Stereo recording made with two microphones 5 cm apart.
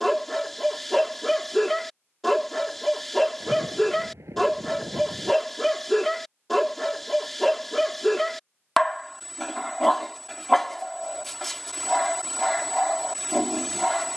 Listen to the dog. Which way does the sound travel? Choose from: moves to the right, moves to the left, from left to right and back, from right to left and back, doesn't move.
doesn't move.